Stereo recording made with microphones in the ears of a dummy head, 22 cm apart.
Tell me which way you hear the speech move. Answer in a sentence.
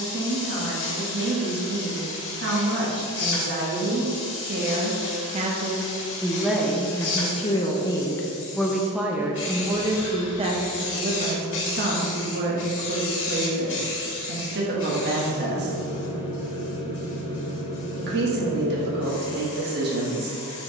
In this clip you hear the speech move from right to left and back again.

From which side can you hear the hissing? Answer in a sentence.
You can hear the hissing on the left.